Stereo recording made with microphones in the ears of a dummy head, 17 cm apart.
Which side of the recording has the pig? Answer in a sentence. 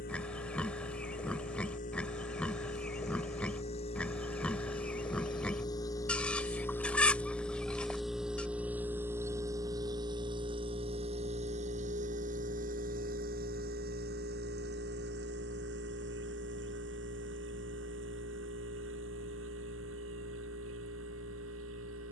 You can hear the pig in the centre.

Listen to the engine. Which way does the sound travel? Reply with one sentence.
In this clip you hear the engine travel towards the right.